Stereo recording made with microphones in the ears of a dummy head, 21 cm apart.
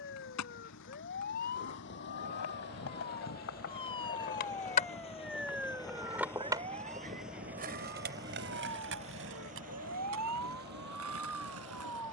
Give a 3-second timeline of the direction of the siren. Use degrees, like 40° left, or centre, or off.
40° left, 10° left, 40° right, 80° right.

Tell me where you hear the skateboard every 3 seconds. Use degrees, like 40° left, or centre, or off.
70° left, 40° left, 30° right, 60° right.